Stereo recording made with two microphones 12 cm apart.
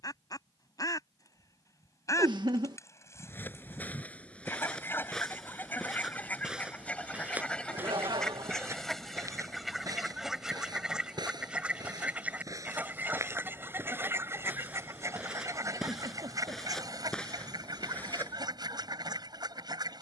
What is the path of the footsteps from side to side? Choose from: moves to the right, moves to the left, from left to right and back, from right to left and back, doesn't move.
from left to right and back.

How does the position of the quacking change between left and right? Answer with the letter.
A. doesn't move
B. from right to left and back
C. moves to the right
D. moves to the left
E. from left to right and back
C.